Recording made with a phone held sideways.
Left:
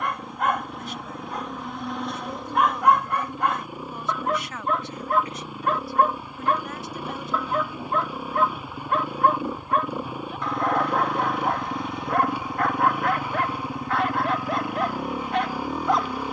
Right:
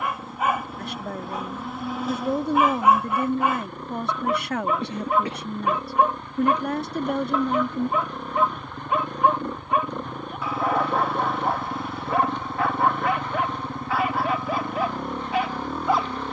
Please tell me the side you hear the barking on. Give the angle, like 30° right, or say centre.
centre.